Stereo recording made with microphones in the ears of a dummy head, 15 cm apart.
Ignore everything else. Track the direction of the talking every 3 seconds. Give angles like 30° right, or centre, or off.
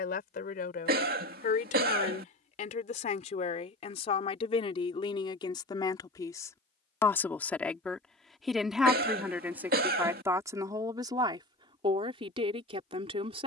50° left, 30° left, 10° left, 20° right, 30° right.